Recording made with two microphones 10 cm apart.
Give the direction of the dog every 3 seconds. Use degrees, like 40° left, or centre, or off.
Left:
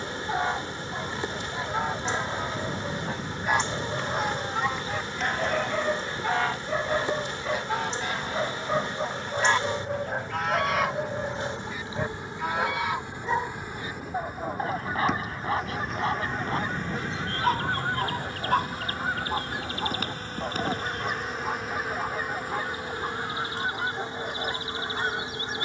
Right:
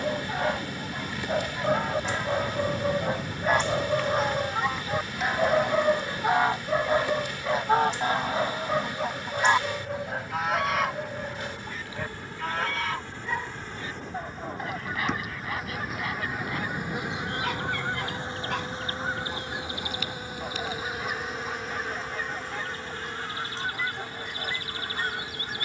50° right, 30° right, 10° right, 10° left, 30° left, 40° left, 40° left, 50° left, 50° left.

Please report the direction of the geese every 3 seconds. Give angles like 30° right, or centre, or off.
20° left, centre, 30° right, centre, 20° left, 20° left, 20° left, 20° left, 20° left.